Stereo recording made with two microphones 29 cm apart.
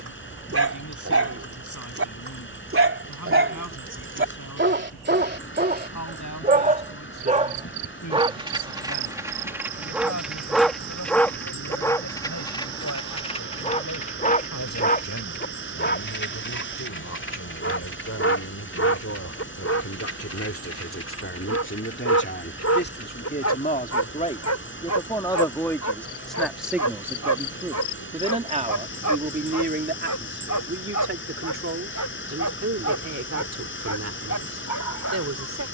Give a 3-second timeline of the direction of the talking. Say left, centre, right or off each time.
left, left, left, left, left, left, left, left, centre, right, right, right.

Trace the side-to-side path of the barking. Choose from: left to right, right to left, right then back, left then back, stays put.
right to left.